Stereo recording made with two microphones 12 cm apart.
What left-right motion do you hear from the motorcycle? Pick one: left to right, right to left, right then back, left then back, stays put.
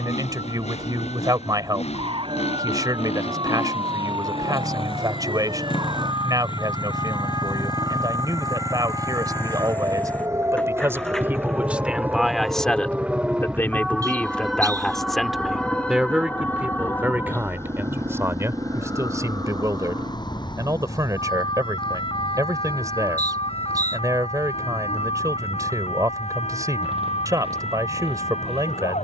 left to right.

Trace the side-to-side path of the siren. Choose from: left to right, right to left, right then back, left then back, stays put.
right to left.